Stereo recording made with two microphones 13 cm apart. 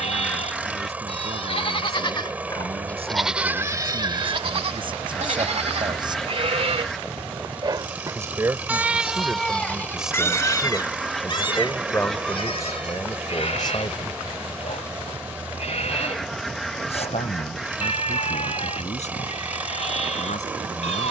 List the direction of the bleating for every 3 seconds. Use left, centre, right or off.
left, right, right, left, left, left, left.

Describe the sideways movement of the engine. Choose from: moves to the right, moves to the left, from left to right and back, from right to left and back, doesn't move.
doesn't move.